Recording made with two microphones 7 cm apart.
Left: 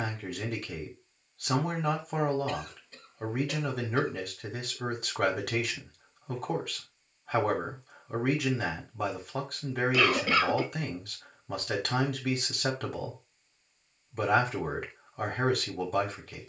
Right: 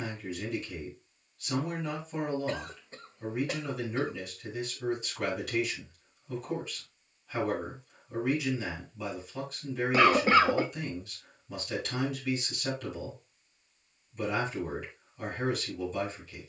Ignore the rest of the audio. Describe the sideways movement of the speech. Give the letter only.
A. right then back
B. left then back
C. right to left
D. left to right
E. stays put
E.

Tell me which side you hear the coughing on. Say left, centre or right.
right.